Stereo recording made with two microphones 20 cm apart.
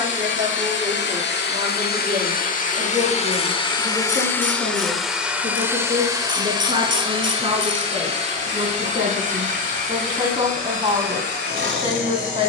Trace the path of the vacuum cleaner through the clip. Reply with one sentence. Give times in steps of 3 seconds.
You can hear the vacuum cleaner on the left from 0 s, in the centre from 3 s and on the right from 6 s.